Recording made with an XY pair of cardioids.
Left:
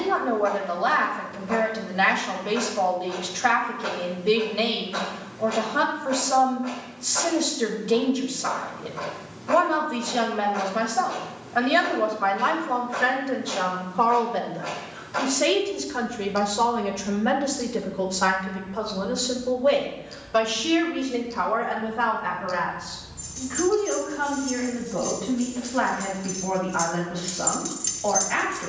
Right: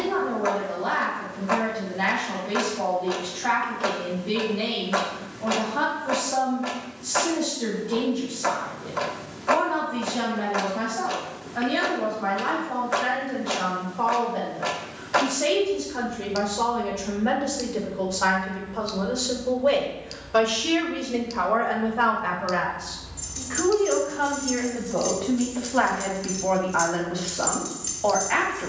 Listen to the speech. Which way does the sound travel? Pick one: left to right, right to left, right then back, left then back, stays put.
left to right.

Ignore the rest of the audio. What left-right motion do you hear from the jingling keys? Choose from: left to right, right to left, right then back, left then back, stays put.
right to left.